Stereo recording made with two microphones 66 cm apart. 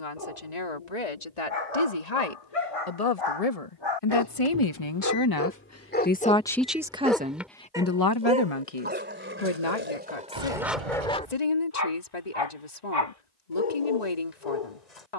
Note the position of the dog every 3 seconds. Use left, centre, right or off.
left, left, centre, centre, left.